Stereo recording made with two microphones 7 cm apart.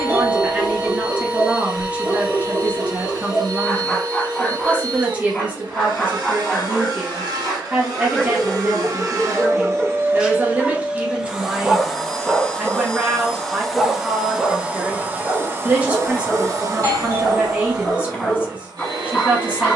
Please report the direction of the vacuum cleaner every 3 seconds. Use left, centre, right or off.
right, right, right, right, centre, right, right.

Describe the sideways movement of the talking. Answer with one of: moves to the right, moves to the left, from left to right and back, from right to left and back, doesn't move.
doesn't move.